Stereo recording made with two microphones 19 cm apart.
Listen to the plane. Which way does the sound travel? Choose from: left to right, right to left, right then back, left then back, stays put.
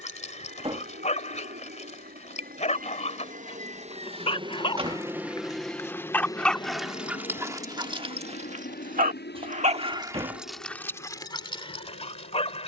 right to left.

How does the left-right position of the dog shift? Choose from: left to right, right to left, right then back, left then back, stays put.
right then back.